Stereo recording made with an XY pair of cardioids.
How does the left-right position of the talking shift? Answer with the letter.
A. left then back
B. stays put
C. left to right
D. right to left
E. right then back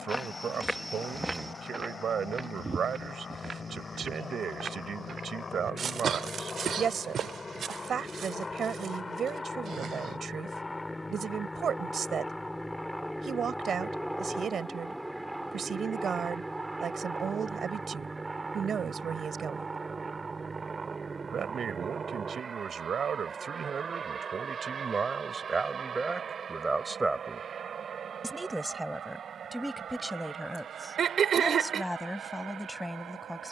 D.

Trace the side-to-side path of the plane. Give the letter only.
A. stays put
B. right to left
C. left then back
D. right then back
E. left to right
E.